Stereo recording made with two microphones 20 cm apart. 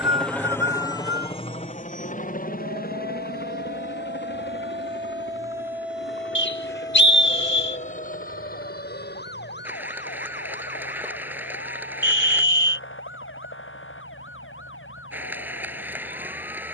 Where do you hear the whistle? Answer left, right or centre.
left.